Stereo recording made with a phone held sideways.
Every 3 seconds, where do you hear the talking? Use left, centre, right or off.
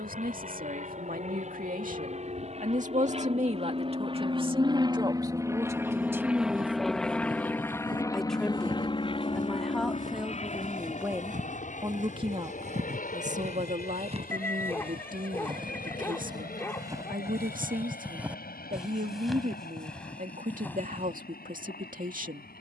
right, right, centre, centre, right, right, right, right.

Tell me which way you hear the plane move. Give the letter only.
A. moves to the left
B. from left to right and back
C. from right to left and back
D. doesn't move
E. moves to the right
A.